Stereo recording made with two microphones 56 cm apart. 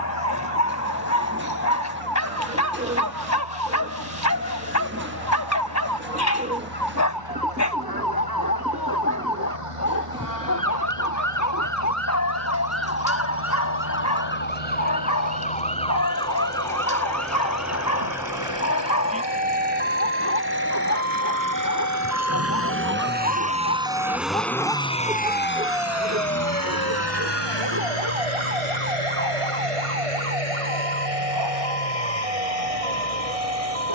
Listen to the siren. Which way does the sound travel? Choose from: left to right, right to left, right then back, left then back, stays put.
left to right.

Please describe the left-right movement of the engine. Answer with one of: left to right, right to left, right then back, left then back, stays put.
right to left.